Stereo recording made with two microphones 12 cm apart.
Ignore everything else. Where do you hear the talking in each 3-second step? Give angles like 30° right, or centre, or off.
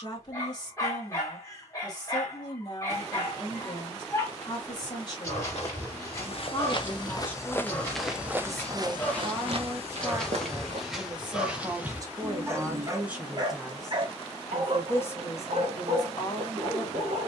40° left, 40° left, 10° left, 30° right, 10° right, 30° left.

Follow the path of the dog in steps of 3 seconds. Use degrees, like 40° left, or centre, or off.
20° left, 20° left, 20° left, centre, 40° right, 70° right.